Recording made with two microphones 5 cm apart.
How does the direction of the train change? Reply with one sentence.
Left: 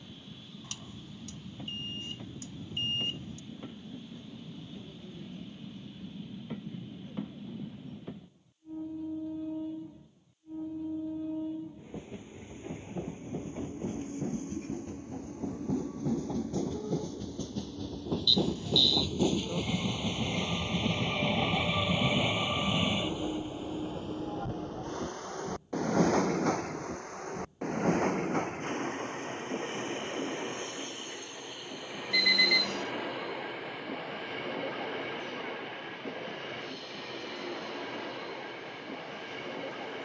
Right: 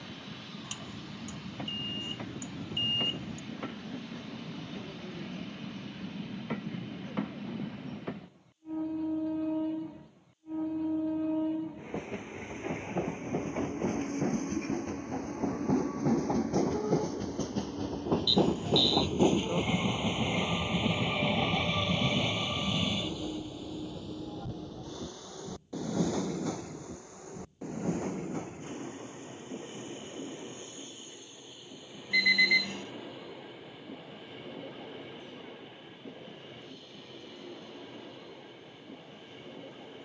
You can hear the train travel towards the left.